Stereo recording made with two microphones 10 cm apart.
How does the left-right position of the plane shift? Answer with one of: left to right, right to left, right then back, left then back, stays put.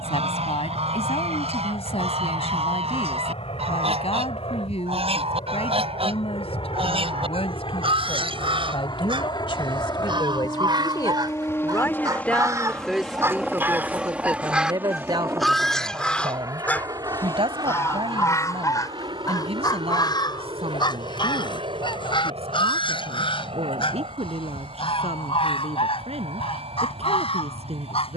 left to right.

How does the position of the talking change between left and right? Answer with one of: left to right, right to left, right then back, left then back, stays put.
left to right.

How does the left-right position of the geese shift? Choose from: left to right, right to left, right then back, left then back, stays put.
right to left.